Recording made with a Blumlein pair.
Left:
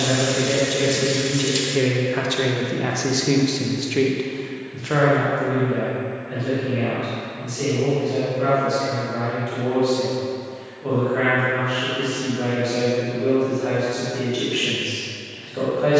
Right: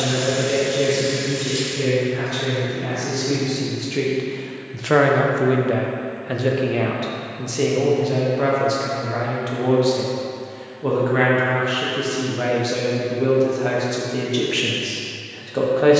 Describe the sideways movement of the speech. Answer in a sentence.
In this clip you hear the speech go from the left side to the right.